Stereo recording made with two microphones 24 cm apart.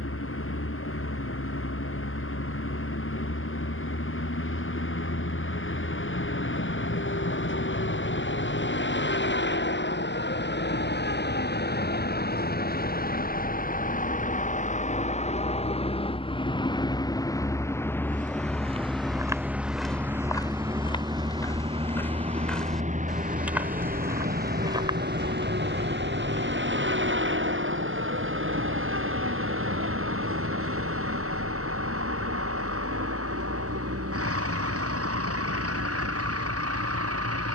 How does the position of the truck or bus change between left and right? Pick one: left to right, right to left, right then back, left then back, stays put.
left to right.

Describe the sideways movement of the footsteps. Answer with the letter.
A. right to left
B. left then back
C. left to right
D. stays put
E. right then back
B.